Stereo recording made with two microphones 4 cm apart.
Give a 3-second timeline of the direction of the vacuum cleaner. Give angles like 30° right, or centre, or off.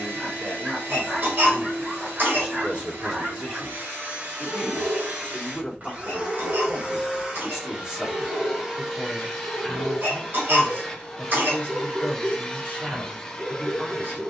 70° right, 50° right, 20° right, centre, 10° left.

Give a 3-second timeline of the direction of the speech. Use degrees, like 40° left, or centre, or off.
40° right, 10° right, 10° right, 50° right, 50° right.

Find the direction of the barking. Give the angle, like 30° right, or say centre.
40° right.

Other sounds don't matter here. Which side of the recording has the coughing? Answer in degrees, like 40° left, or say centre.
50° right.